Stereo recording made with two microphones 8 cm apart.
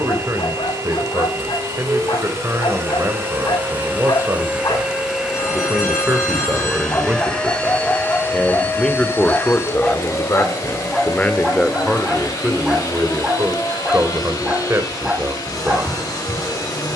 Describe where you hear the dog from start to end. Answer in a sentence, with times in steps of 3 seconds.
You can hear the dog on the left from 0 s and in the centre from 9 s.